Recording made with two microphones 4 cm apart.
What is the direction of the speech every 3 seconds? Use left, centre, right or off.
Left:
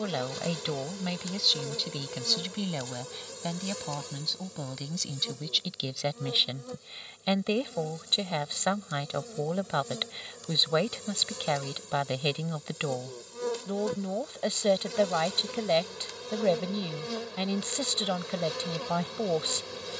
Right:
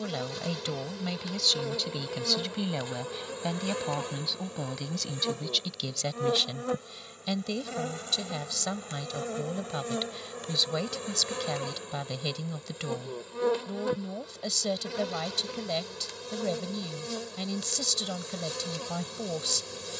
centre, centre, left, left, left, left, left.